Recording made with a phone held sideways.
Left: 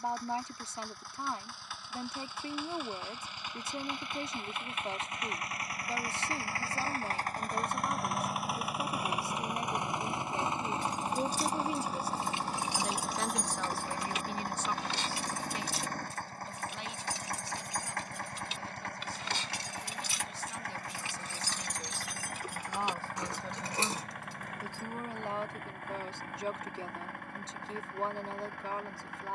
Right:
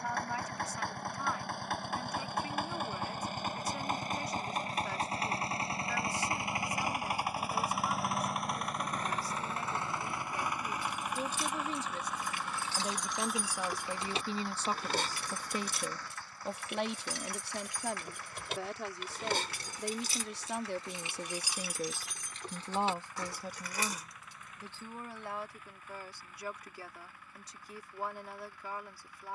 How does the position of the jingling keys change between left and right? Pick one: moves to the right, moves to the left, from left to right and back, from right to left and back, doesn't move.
from left to right and back.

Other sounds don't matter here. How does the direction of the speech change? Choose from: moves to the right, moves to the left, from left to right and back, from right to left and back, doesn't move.
from left to right and back.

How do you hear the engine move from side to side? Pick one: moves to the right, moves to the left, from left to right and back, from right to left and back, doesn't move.
moves to the left.